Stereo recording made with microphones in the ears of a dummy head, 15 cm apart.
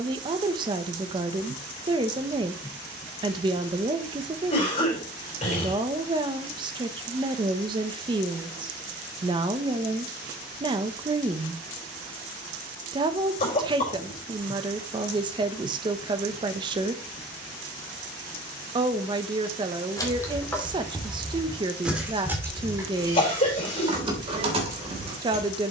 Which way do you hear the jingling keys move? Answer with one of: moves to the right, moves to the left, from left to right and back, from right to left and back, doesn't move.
moves to the right.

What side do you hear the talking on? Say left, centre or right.
right.